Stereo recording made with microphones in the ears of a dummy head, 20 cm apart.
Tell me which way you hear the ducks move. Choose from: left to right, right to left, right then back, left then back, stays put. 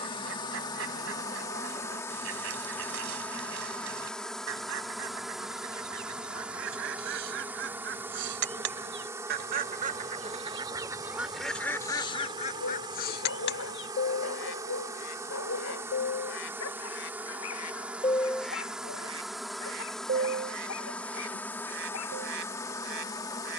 left then back.